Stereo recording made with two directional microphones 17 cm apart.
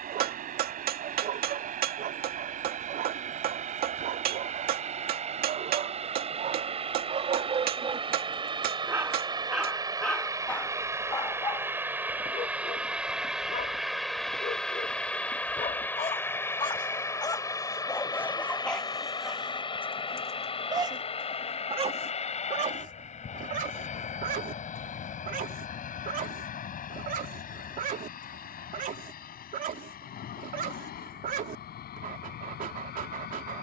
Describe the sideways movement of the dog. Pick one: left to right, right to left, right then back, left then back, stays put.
left then back.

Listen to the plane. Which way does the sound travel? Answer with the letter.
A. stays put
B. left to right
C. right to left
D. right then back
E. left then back
C.